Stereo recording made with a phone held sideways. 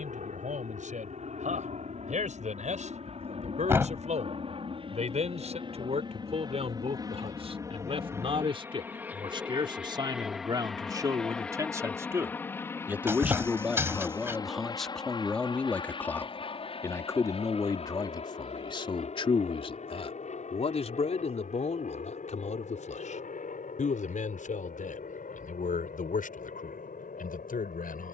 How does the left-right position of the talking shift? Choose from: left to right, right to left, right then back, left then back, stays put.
right to left.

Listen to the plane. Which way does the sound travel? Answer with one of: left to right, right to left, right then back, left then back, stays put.
right to left.